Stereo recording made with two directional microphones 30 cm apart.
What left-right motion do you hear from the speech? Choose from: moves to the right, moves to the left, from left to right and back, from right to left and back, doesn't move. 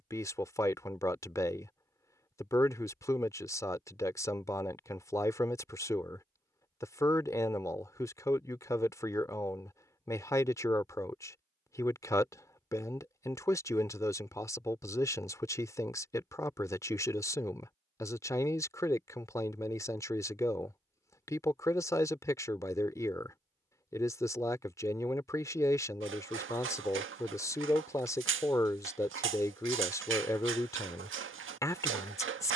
doesn't move.